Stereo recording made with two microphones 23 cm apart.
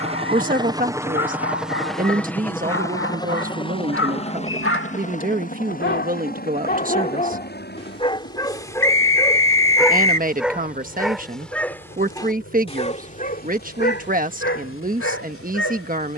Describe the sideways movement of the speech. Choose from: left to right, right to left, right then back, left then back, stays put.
stays put.